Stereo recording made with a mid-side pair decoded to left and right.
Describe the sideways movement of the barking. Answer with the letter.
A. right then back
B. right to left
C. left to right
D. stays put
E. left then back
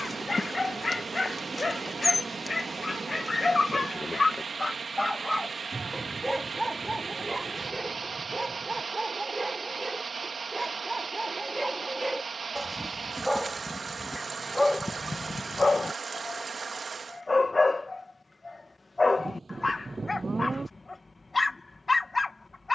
A.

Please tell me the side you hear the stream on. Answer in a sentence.
In this clip you hear the stream on the right.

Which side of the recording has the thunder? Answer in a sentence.
You can hear the thunder on the right.